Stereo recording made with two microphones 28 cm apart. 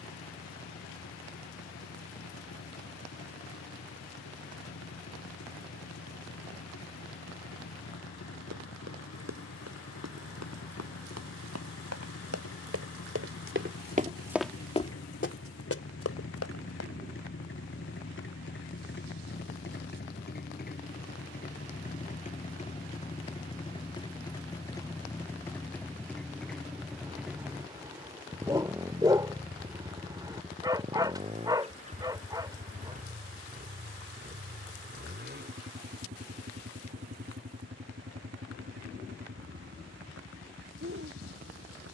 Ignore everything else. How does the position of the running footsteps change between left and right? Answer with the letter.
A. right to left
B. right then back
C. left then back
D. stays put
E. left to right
A.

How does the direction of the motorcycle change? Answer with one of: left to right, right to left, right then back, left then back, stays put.
left to right.